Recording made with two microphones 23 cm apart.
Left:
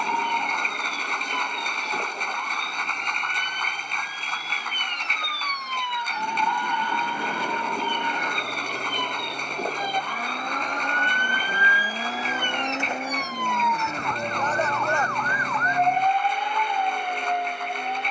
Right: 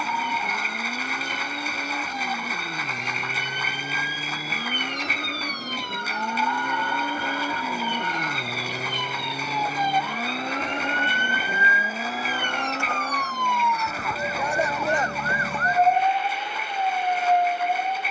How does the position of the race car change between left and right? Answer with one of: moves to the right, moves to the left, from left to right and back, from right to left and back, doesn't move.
moves to the left.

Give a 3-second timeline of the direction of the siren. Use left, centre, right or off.
left, left, left, left, centre, right.